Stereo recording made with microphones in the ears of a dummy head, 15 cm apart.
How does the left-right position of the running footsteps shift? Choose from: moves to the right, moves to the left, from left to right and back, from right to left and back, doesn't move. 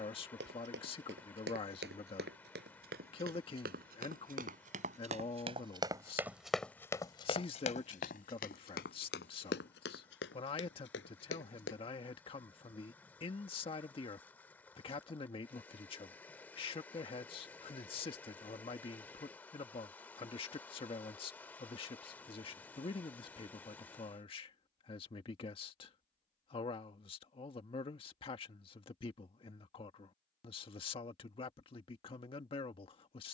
moves to the left.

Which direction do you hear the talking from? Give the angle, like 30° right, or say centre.
30° left.